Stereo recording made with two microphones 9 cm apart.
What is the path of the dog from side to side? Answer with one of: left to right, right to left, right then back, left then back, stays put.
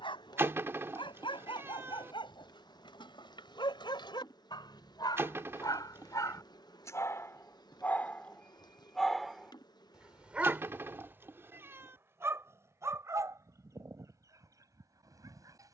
left to right.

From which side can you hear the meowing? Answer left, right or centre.
right.